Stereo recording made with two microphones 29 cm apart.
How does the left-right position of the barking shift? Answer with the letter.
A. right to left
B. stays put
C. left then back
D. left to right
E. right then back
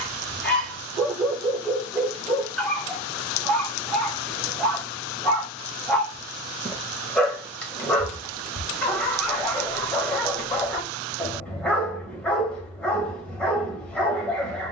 B.